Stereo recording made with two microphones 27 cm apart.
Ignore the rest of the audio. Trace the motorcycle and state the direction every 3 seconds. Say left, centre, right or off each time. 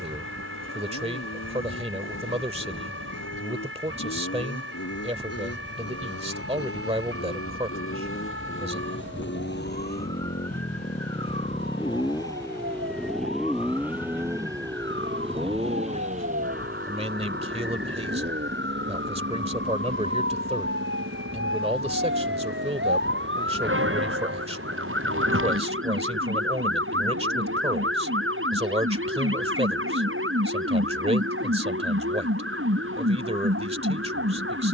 left, left, left, left, centre, right, right, right, right, right, right, right.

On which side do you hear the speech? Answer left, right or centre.
right.